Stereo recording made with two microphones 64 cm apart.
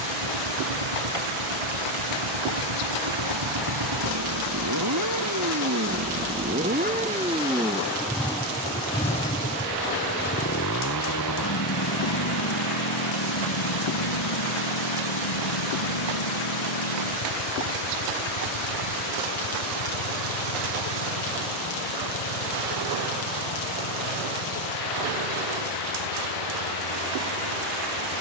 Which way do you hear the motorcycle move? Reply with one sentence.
In this clip you hear the motorcycle go from the right side to the left.